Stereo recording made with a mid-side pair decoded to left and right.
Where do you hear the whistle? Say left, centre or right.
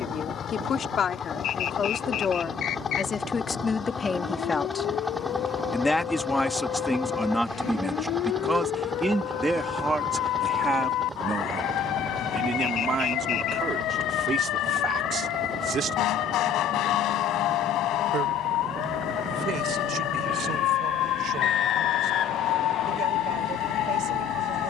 left.